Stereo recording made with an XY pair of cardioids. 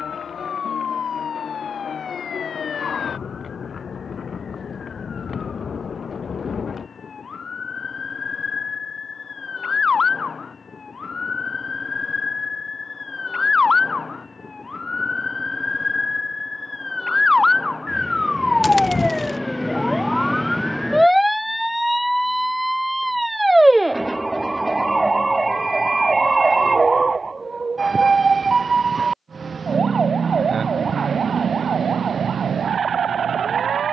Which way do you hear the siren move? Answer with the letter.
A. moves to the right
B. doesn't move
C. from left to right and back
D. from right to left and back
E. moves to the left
A.